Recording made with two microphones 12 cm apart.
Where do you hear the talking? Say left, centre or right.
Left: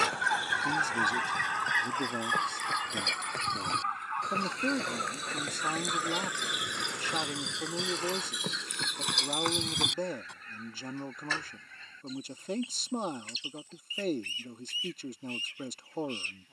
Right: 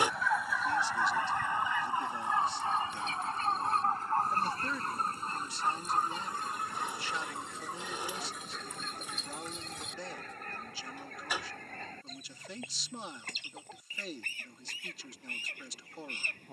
left.